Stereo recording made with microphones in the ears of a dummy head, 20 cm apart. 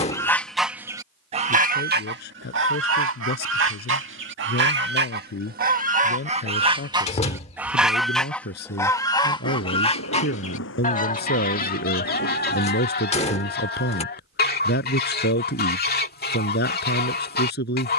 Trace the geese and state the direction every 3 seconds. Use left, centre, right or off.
right, right, centre, left, left, left.